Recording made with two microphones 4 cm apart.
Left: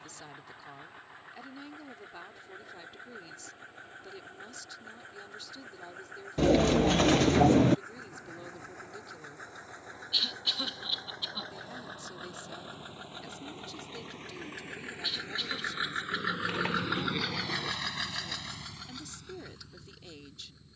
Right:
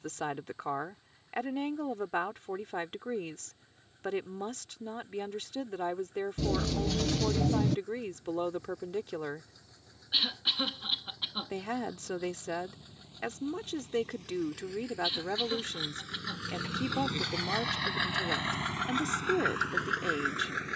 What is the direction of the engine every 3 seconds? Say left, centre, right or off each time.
left, left, left, left, left, left, right.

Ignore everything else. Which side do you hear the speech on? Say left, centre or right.
right.